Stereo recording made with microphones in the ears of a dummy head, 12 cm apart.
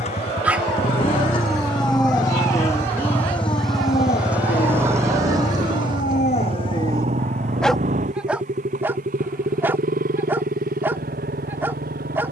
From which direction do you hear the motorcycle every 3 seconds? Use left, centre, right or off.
left, centre, right, right.